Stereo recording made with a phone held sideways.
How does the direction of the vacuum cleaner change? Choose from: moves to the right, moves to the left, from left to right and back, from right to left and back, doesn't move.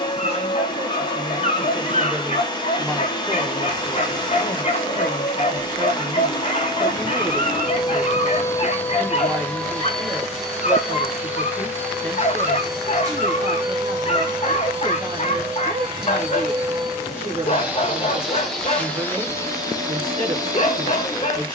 from left to right and back.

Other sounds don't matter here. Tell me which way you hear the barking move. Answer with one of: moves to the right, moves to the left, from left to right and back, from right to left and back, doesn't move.
doesn't move.